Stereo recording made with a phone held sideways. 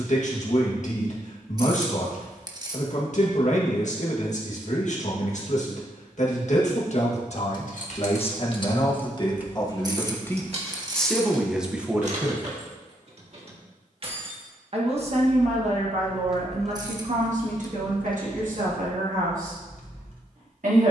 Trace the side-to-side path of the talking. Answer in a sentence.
In this clip you hear the talking travel towards the right.